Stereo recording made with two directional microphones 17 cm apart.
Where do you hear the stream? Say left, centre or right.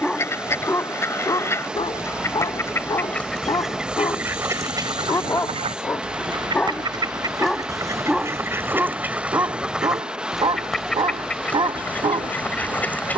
centre.